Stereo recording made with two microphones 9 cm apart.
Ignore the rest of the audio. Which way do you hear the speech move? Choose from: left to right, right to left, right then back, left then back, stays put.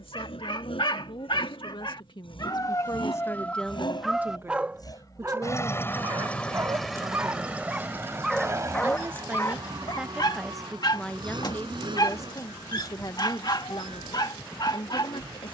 right then back.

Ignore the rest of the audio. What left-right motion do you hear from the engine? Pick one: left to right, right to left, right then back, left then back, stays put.
left to right.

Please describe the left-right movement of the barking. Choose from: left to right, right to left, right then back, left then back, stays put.
right then back.